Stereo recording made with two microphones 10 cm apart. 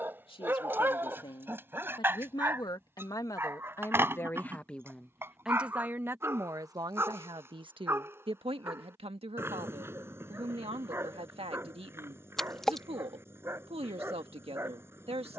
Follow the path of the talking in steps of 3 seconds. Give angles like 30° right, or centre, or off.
50° left, 10° left, 50° right, 70° right, 70° right.